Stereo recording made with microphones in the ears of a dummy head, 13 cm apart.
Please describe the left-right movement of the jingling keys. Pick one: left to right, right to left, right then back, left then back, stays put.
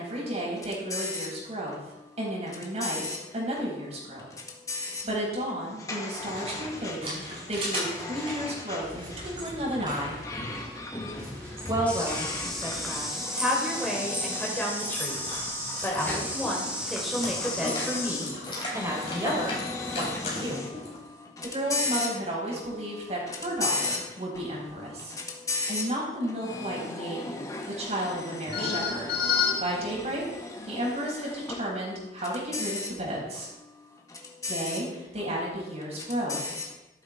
right to left.